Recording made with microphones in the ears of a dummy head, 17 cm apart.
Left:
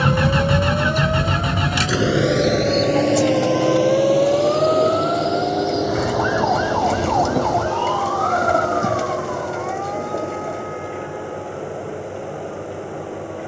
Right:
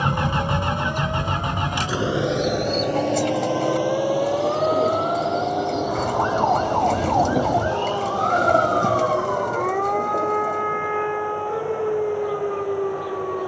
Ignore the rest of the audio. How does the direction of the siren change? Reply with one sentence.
In this clip you hear the siren travel towards the right.